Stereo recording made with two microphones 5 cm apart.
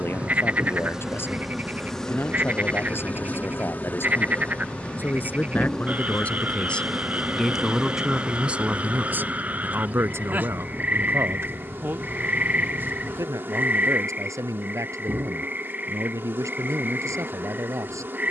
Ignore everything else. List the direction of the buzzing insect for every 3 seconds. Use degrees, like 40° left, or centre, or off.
centre, 20° left, 10° right, 40° right, 50° right, 50° right.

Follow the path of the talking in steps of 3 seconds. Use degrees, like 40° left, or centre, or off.
50° left, 40° left, centre, 60° right, 80° right, 80° right.